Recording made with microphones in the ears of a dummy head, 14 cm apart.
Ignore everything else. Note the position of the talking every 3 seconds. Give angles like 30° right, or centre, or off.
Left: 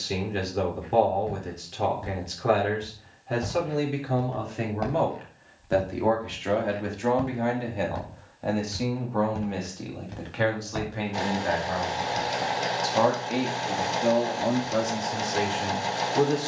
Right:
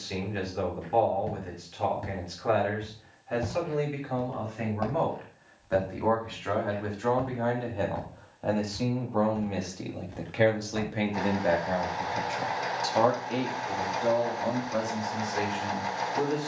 50° left, 40° left, 20° left, 20° right, 10° left, 50° left.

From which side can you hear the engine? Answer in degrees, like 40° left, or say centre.
30° left.